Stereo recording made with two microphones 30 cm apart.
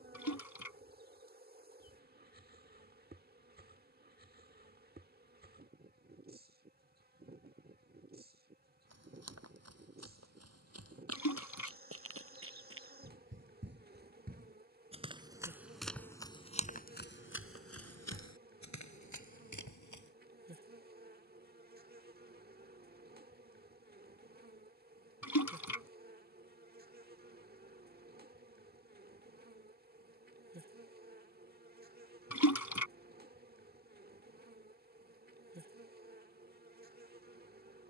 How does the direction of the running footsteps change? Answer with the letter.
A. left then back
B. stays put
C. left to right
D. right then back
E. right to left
E.